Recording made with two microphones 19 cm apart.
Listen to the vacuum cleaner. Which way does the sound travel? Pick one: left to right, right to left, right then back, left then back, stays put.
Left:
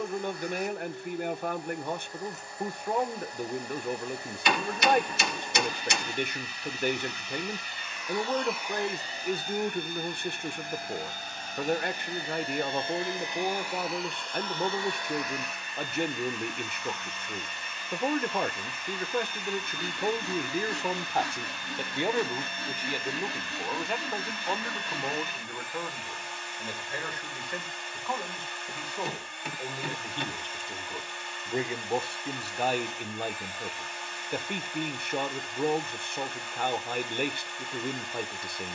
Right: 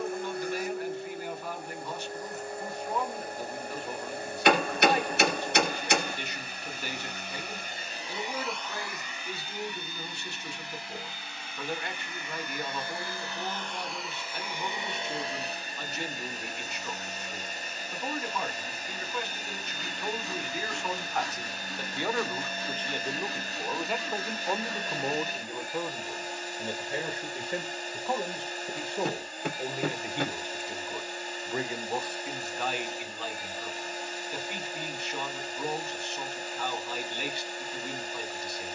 left then back.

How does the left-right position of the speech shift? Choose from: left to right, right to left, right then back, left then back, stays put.
right then back.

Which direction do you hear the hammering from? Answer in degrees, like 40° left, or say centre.
60° right.